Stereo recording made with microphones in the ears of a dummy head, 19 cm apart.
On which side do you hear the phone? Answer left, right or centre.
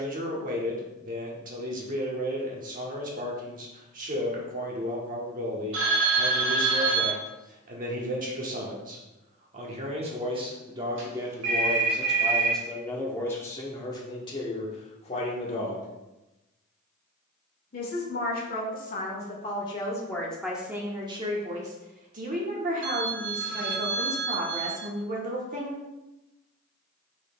right.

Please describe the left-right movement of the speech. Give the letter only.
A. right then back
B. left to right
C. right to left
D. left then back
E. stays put
D.